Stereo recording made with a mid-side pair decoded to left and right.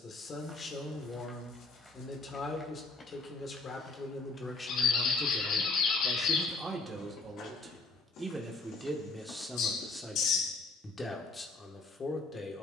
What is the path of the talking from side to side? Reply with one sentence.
In this clip you hear the talking go right and come back.